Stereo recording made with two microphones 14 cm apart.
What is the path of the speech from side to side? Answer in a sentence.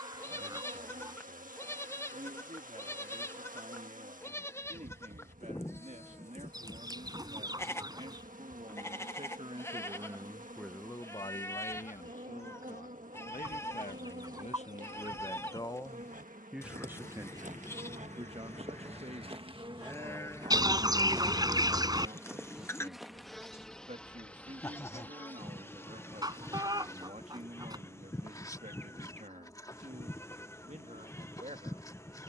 In this clip you hear the speech go left and come back.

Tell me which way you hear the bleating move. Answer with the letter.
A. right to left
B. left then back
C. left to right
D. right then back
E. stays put
E.